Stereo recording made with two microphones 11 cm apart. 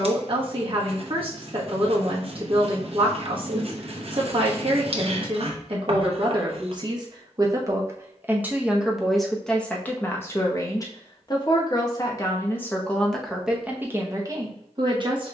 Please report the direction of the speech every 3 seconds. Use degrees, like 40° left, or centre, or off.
50° right, 50° right, 30° right, 20° left, centre.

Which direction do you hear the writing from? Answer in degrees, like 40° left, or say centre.
60° right.